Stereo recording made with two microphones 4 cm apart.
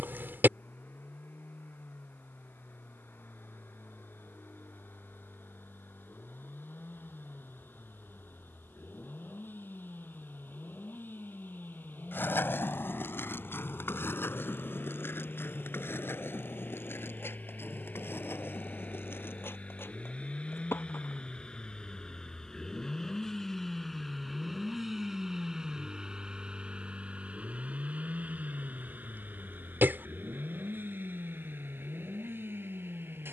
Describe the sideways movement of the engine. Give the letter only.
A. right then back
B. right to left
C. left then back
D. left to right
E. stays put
D.